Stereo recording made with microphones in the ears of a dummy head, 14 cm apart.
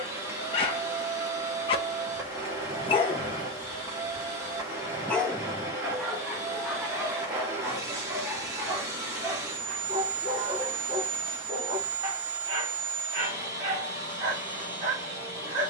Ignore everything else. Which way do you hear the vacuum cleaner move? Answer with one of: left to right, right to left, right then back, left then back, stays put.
stays put.